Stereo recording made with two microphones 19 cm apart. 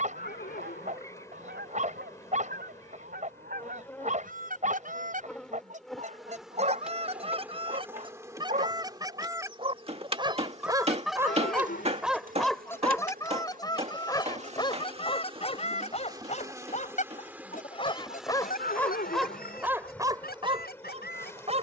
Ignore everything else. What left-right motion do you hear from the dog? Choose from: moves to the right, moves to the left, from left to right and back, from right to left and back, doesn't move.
from right to left and back.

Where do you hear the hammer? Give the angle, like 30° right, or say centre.
30° right.